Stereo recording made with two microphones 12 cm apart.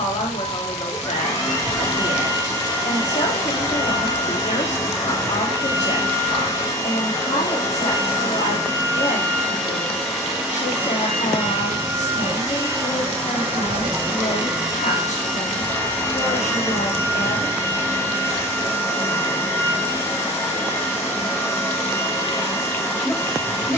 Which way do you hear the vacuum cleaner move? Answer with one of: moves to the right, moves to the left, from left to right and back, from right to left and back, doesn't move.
from left to right and back.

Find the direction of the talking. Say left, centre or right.
left.